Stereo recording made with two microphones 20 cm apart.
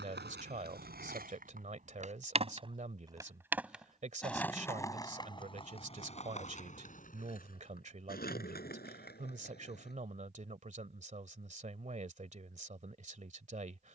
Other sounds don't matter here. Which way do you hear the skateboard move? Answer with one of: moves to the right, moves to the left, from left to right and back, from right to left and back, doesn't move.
moves to the left.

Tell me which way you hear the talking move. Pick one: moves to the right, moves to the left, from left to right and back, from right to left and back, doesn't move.
doesn't move.